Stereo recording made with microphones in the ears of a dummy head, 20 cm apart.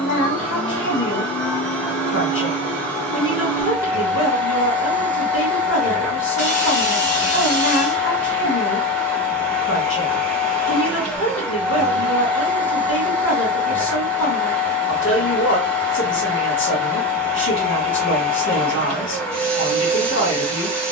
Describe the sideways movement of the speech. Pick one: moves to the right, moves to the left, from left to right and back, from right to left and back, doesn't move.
doesn't move.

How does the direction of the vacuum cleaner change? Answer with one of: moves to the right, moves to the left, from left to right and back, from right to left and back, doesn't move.
doesn't move.